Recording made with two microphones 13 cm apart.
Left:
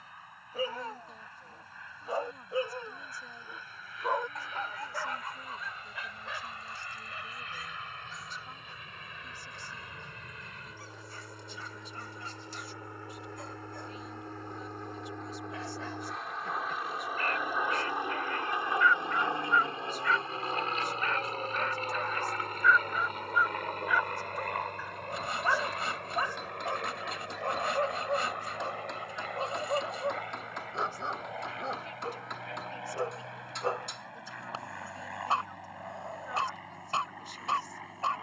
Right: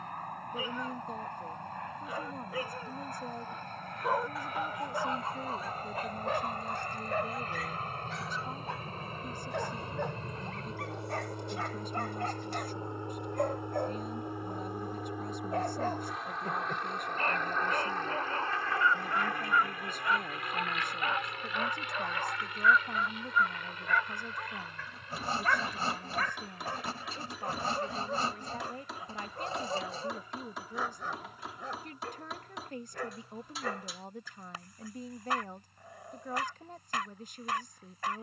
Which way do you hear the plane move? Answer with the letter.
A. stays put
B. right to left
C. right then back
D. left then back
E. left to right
B.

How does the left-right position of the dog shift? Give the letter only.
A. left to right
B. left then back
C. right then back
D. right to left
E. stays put
C.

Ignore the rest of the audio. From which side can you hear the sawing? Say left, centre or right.
right.